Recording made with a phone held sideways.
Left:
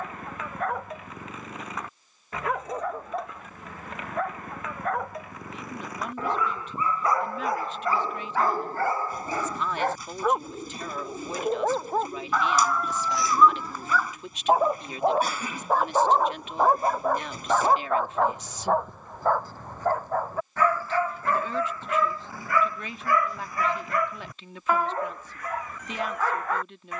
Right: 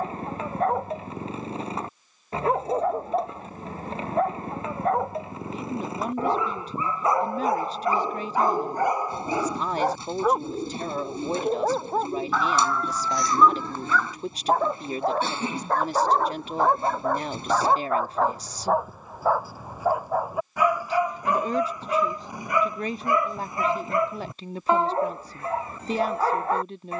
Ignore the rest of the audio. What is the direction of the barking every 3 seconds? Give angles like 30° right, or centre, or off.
30° right, 30° right, 20° right, 10° right, centre, centre, 10° right, 20° right, 30° right.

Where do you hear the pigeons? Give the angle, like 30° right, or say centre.
30° right.